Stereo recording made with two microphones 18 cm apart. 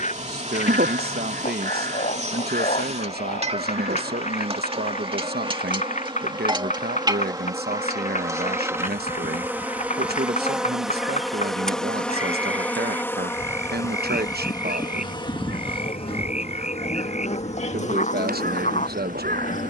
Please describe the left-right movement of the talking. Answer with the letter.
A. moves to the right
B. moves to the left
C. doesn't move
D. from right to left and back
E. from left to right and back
C.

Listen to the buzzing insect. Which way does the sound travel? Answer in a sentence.
You can hear the buzzing insect travel towards the left.